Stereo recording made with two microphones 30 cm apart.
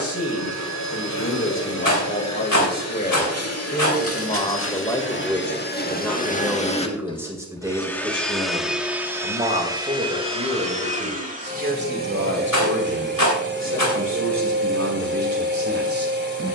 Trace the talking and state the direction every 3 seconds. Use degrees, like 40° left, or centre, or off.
40° left, 20° left, 10° right, 30° right, 40° right, 50° right.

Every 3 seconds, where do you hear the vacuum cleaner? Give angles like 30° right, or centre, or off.
60° left, 40° left, 10° left, 20° right, 40° right, 40° right.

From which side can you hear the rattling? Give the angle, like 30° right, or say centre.
90° left.